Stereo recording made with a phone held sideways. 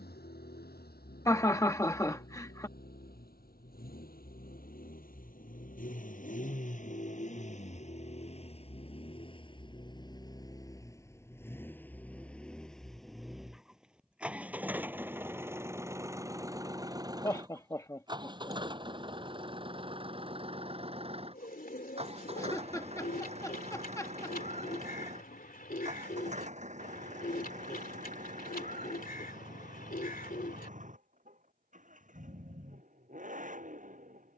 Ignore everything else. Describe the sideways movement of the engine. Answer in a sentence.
In this clip you hear the engine travel towards the right.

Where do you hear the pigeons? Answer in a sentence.
You can hear the pigeons on the left.